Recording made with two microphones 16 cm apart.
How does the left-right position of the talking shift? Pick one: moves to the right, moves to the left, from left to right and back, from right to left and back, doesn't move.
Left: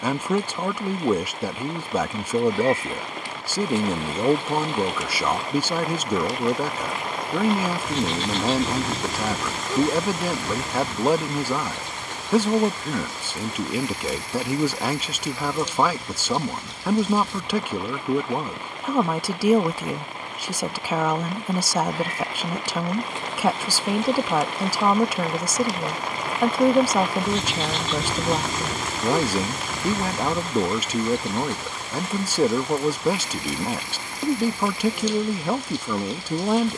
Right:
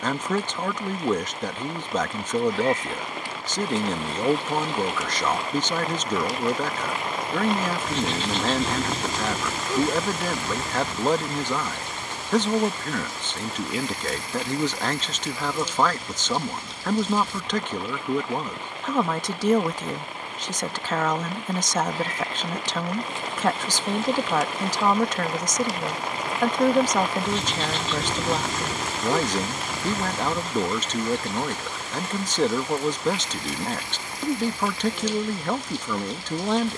doesn't move.